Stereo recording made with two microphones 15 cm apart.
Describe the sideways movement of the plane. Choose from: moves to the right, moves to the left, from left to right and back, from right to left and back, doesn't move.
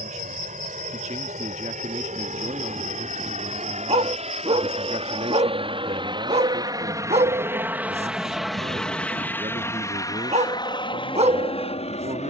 moves to the left.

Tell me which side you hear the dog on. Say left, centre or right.
right.